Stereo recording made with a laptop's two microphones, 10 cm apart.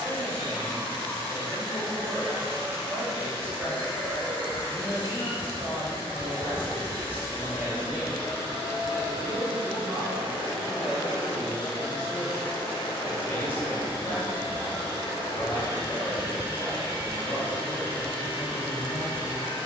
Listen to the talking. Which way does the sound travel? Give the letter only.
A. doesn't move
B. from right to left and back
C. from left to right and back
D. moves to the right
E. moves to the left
E.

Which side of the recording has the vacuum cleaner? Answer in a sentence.
You can hear the vacuum cleaner on the left.